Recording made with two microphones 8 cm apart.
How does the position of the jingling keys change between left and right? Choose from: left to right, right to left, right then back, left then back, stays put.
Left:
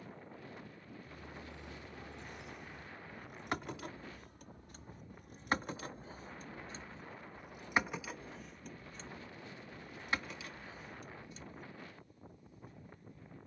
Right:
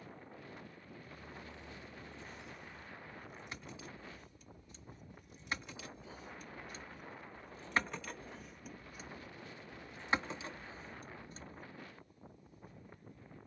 left to right.